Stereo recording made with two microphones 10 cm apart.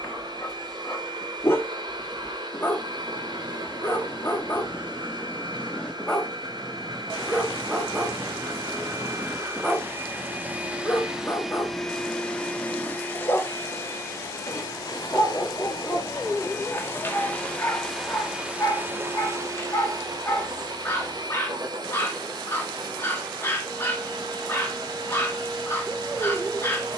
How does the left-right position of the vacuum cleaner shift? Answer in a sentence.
You can hear the vacuum cleaner move from right to left and back again.